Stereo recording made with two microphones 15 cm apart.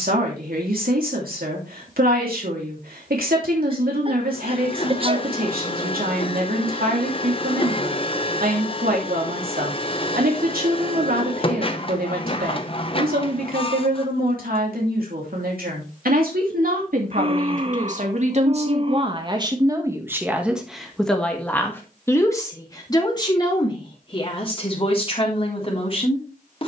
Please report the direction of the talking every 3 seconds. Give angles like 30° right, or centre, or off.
80° right, 80° right, 80° right, 80° right, 80° right, 70° right, 30° right, 20° left, 40° left.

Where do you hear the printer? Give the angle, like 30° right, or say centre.
40° left.